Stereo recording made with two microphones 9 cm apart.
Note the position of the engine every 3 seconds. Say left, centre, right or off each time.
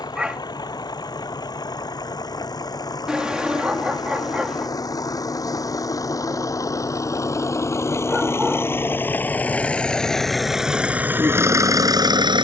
left, left, left, centre.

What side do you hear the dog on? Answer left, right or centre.
centre.